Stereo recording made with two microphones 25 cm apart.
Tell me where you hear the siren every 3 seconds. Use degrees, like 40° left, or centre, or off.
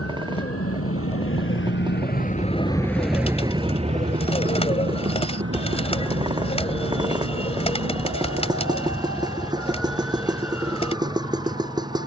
50° left, 40° right, 60° right, 70° right.